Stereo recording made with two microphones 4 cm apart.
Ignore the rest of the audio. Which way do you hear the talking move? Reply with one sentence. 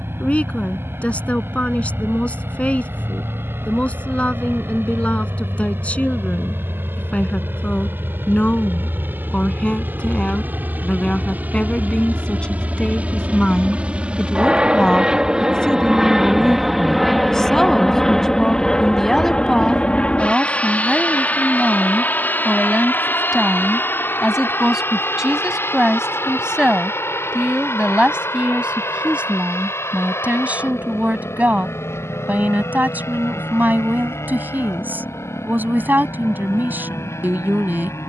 You can hear the talking travel towards the right.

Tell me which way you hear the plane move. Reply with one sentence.
In this clip you hear the plane move to the left.